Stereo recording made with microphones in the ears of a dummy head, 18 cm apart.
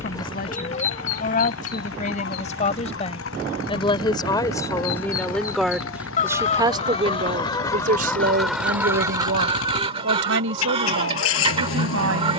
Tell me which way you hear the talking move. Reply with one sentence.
In this clip you hear the talking move to the right.